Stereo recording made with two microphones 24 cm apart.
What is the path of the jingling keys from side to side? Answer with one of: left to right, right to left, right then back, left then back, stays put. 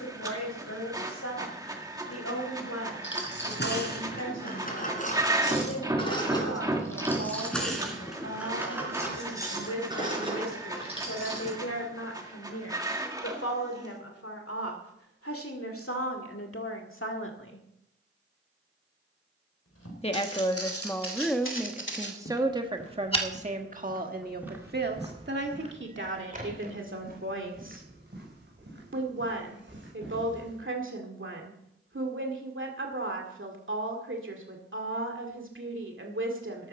left to right.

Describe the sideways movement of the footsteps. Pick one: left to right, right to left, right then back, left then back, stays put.
left to right.